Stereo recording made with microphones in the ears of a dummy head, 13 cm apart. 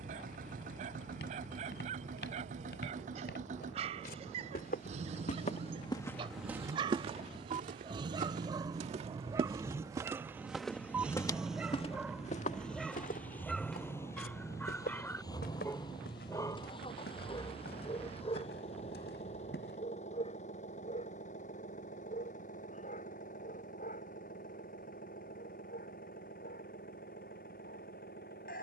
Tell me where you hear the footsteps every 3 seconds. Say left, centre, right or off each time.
left, left, right, centre, left, left, left, off, off, off.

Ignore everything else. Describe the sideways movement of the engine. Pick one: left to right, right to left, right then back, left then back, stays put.
right to left.